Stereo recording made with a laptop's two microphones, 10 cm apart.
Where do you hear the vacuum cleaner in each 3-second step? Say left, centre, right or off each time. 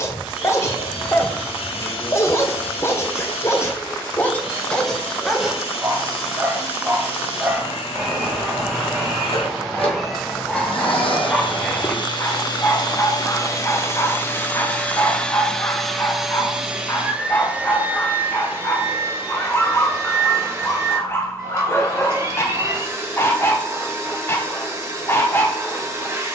left, left, left, left, left, centre, right, right, right.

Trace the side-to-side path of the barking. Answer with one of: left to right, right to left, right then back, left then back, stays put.
right then back.